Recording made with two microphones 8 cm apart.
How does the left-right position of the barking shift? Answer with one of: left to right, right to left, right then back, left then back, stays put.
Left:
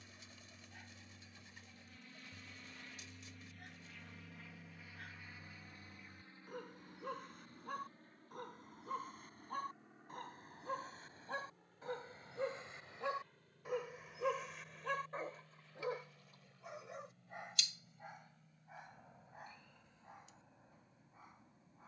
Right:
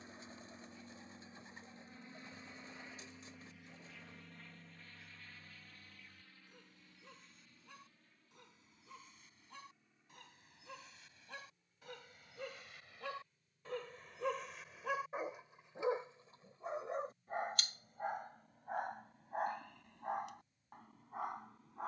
left to right.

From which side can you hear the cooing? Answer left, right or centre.
right.